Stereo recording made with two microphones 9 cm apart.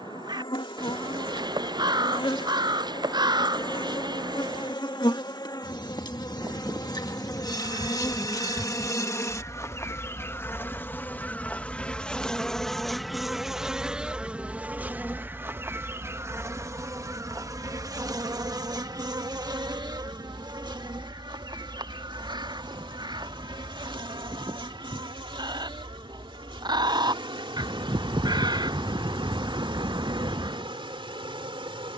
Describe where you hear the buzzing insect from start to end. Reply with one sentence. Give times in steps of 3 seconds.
In this clip you hear the buzzing insect on the left from 0 s, in the centre from 12 s and on the right from 15 s.